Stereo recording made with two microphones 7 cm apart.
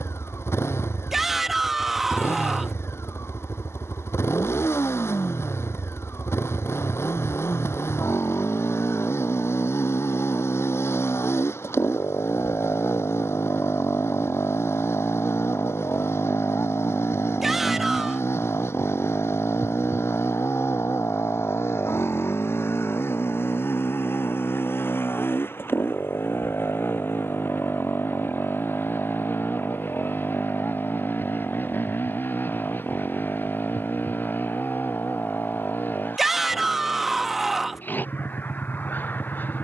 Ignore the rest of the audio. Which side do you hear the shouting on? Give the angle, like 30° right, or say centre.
centre.